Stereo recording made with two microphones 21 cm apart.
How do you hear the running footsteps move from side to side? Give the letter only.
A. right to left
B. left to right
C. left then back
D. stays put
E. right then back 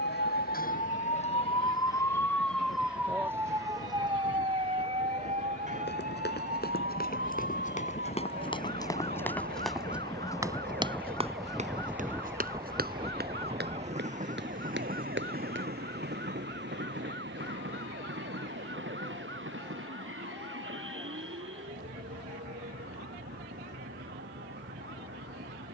B.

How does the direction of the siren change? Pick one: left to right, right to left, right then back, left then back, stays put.
left to right.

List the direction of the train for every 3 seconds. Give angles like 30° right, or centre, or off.
60° left, 60° left, 40° left, 10° left, 30° right, 50° right, 70° right, 70° right, 80° right.